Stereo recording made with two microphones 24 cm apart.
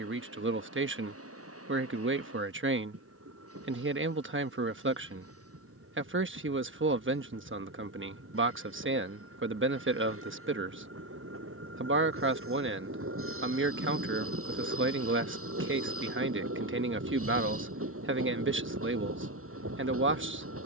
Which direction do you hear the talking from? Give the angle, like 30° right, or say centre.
50° right.